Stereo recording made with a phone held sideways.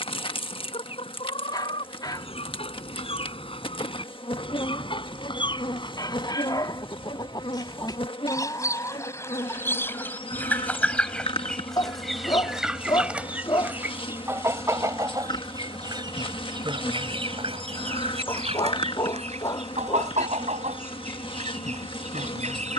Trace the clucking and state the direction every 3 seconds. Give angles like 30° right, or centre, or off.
40° left, 40° left, 30° left, 10° left, 10° right, 40° right, 50° right, 60° right.